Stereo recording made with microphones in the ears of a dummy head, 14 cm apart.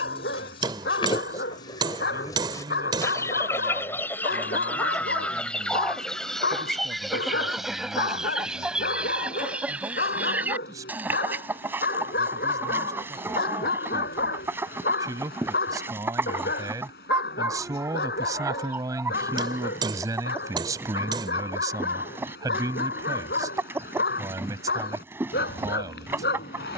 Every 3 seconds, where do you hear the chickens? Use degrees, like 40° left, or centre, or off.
30° left, 10° left, centre, 10° right, 10° right, 10° right, 10° right, 10° right, 10° right.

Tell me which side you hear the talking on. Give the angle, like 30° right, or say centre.
20° right.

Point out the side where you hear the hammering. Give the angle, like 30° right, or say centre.
30° right.